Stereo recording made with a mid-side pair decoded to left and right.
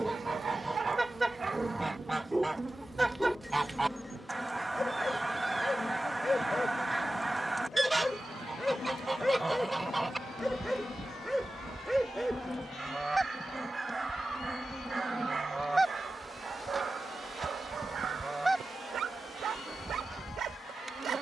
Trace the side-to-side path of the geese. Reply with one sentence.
In this clip you hear the geese stay in one place.